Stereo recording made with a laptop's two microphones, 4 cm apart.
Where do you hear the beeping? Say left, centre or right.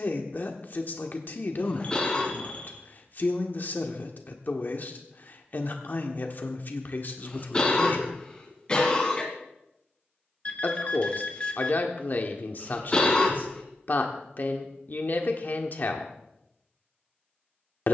left.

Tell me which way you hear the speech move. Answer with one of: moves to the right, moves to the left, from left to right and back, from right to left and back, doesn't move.
doesn't move.